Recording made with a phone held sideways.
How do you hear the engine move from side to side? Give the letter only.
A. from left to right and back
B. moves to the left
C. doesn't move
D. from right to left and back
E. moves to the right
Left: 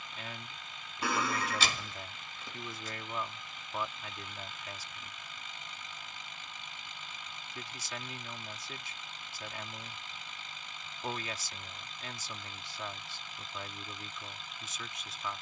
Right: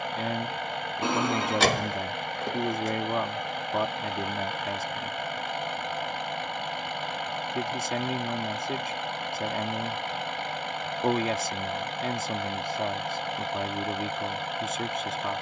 C.